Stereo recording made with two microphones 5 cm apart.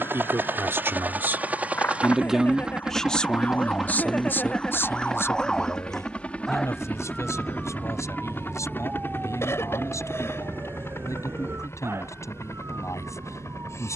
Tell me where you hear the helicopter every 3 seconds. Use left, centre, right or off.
right, centre, left, left, left.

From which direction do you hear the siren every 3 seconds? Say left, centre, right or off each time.
left, left, centre, right, right.